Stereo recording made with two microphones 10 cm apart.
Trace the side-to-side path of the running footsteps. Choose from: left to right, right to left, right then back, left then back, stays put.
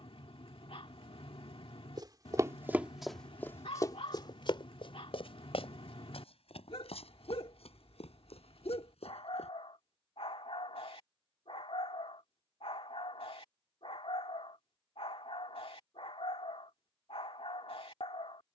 right to left.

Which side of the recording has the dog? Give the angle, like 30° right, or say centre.
70° left.